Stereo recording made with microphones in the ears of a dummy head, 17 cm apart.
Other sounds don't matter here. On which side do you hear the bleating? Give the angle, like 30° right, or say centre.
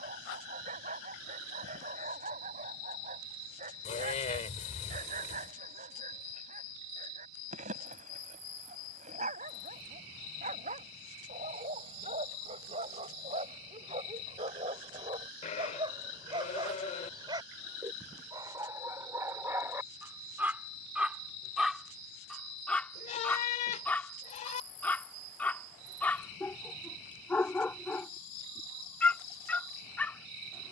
40° left.